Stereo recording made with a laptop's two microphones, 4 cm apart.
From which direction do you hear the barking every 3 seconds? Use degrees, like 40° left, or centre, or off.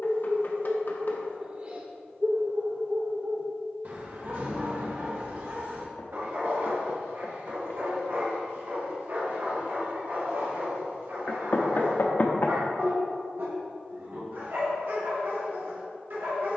30° right, 50° right, 70° right, 70° right, 70° right, 70° right.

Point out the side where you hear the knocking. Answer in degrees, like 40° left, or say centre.
50° left.